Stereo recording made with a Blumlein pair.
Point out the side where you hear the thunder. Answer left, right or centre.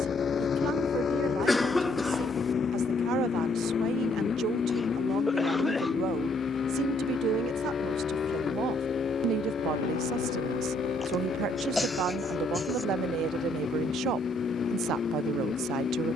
left.